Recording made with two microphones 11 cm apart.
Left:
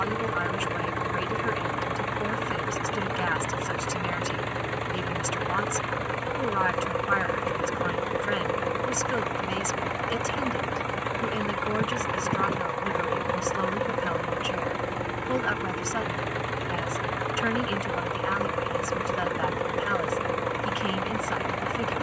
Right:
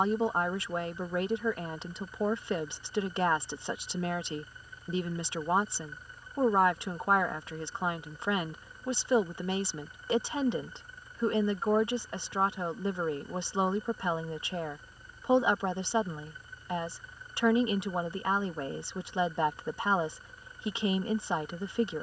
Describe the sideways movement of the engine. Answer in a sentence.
You can hear the engine stay put.